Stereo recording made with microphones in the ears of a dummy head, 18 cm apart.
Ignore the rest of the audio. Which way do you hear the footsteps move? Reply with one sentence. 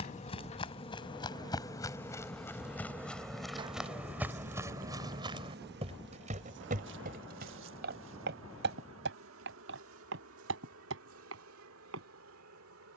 You can hear the footsteps go from the left side to the right.